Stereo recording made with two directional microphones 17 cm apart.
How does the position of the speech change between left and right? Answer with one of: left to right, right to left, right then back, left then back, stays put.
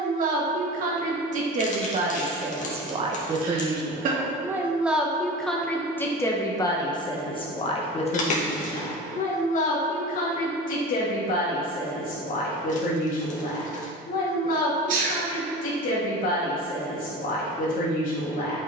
right to left.